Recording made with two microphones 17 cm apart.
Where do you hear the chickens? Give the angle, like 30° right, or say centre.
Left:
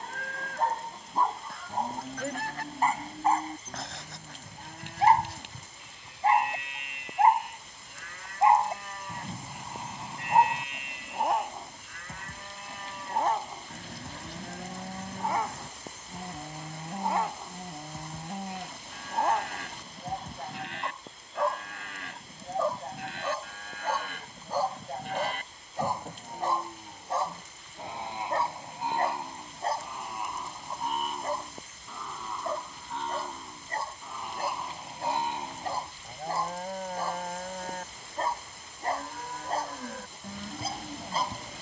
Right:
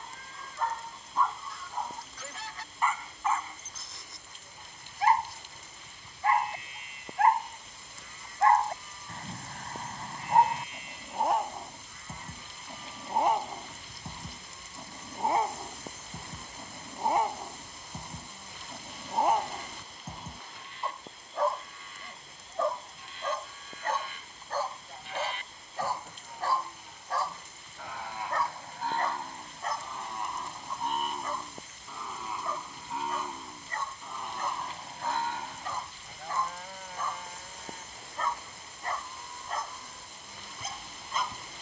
50° left.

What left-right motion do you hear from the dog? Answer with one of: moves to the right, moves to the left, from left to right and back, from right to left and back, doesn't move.
from left to right and back.